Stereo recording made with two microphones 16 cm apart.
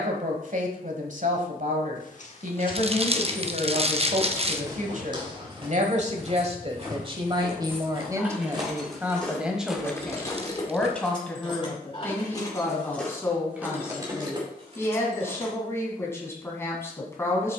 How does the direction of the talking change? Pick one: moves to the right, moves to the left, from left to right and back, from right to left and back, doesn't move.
moves to the left.